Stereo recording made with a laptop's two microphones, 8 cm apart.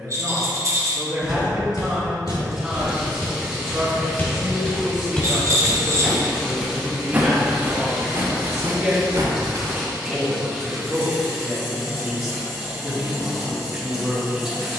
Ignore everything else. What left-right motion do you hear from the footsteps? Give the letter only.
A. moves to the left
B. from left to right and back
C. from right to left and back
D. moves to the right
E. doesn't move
D.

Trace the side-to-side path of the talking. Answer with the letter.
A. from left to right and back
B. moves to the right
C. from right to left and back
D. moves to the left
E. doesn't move
E.